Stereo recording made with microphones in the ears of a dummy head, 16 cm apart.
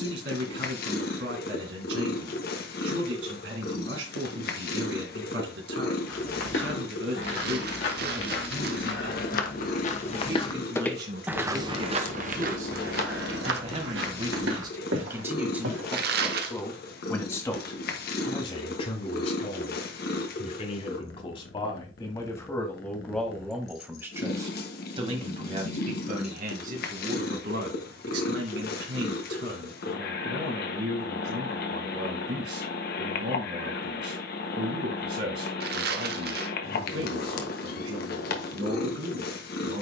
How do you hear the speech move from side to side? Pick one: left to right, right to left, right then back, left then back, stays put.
left then back.